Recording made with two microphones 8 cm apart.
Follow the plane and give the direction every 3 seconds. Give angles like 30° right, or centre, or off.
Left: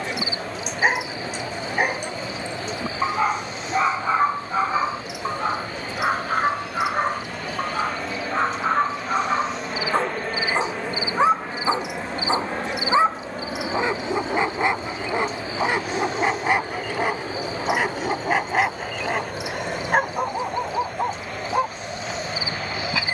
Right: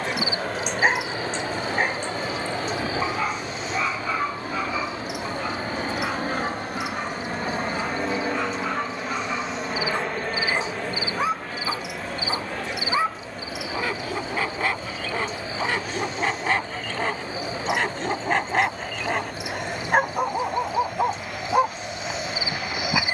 70° right, 60° right, 30° right, 10° left, 30° left, 50° left, 60° left, 60° left.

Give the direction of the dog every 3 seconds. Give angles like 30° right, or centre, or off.
10° left, 30° left, 40° left, 30° left, 20° left, 10° left, centre, 10° right.